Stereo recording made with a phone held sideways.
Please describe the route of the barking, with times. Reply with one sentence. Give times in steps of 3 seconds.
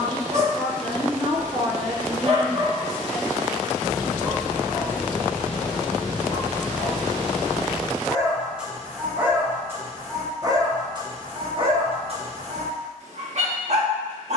You can hear the barking on the right from 0 s, in the centre from 3 s and on the right from 9 s.